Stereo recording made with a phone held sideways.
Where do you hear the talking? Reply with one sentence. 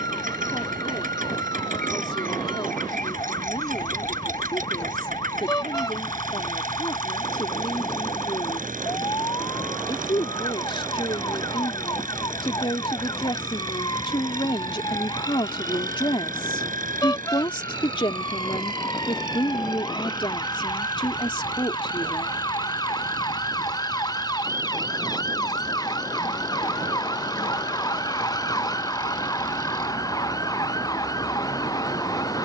In this clip you hear the talking on the left.